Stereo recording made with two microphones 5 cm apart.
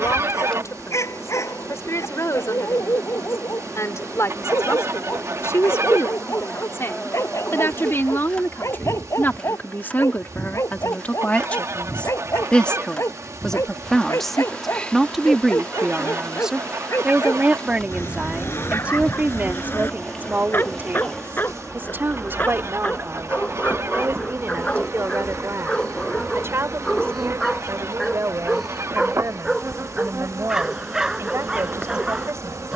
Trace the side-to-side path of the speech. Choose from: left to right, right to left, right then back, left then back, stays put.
left to right.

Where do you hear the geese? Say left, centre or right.
right.